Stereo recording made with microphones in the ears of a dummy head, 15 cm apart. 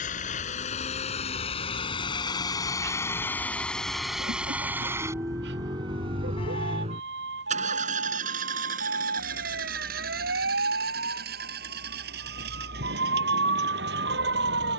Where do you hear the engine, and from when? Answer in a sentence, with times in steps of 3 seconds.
You can hear the engine on the left from 0 s, in the centre from 3 s and on the right from 6 s.